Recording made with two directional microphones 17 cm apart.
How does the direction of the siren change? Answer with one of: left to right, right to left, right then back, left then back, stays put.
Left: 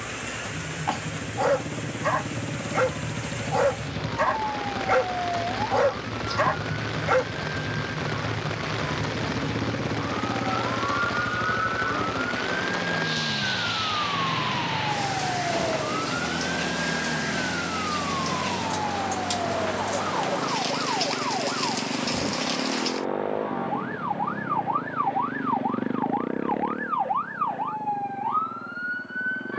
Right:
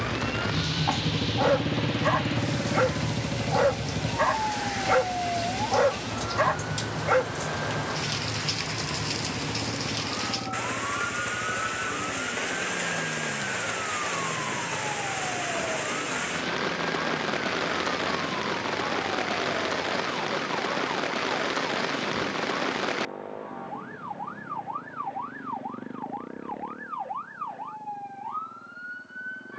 right to left.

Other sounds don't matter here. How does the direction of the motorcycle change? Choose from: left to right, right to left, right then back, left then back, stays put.
right to left.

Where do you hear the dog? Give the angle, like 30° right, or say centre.
10° left.